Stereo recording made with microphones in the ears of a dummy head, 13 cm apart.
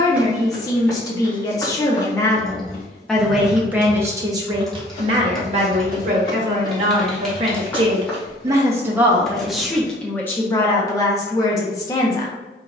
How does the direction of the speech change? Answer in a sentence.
You can hear the speech go right and come back.